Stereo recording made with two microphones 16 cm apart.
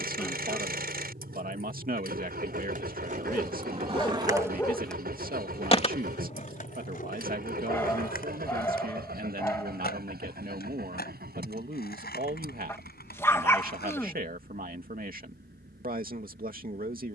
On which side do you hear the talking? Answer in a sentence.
In this clip you hear the talking on the right.